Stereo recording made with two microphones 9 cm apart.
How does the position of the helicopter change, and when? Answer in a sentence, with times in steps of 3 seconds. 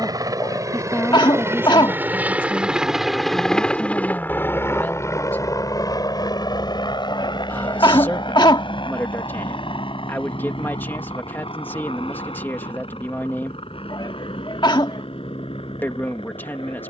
In this clip you hear the helicopter on the right from 0 s and on the left from 3 s.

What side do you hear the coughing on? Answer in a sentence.
You can hear the coughing on the left.